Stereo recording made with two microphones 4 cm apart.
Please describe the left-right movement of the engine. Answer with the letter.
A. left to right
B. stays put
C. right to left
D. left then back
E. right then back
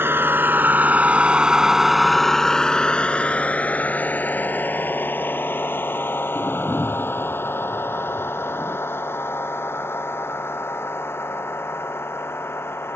C.